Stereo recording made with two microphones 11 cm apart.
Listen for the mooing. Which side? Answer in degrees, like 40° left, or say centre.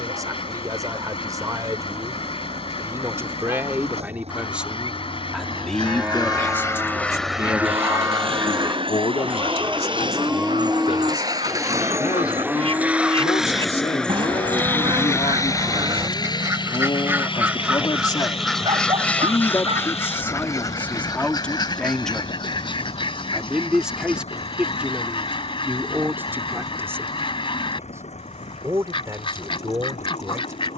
10° right.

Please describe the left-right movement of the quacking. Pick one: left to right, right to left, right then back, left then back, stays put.
right then back.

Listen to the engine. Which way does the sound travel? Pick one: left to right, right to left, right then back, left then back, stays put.
right to left.